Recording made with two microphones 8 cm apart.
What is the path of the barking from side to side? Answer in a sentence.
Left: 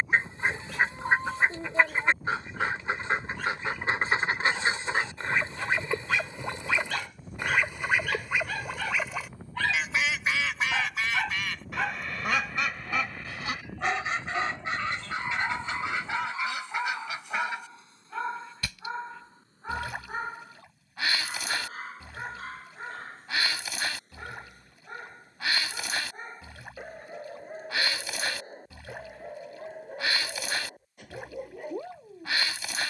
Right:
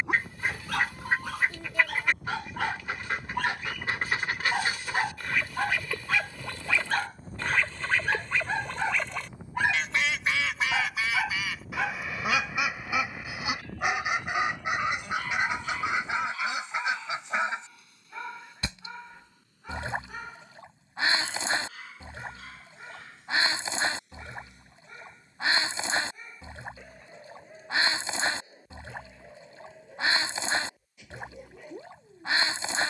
You can hear the barking travel towards the left.